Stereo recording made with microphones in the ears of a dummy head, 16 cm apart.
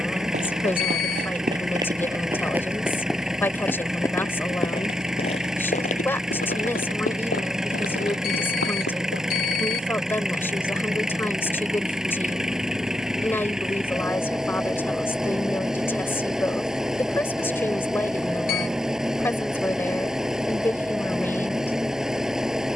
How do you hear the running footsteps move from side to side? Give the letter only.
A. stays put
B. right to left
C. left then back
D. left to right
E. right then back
B.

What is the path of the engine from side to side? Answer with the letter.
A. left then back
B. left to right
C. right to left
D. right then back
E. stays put
E.